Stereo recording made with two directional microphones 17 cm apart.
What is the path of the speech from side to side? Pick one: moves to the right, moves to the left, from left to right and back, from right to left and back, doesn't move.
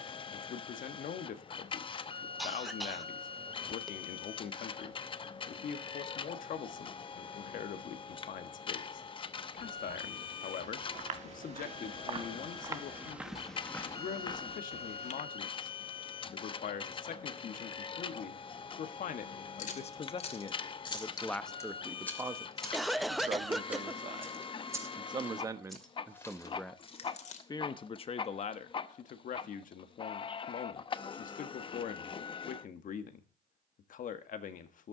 from left to right and back.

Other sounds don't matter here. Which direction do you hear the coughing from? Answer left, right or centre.
centre.